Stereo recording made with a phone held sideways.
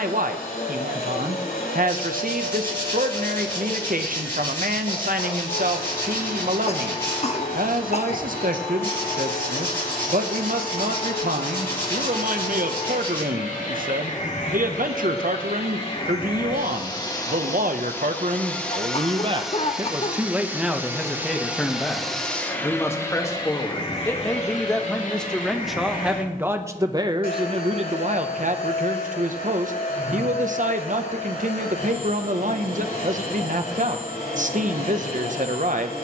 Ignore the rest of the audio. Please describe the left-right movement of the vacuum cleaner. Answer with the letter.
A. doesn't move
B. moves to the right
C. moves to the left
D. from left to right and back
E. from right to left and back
D.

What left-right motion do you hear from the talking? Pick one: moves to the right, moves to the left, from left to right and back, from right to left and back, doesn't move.
from right to left and back.